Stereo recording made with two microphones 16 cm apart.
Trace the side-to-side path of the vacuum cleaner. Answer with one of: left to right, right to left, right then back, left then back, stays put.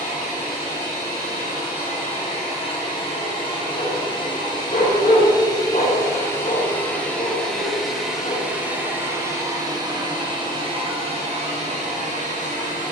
left to right.